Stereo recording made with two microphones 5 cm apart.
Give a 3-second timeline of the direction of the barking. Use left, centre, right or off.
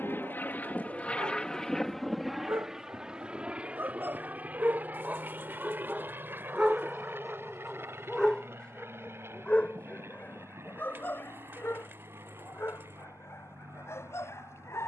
right, right, centre, left, left.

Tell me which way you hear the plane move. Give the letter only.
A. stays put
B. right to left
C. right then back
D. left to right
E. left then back
D.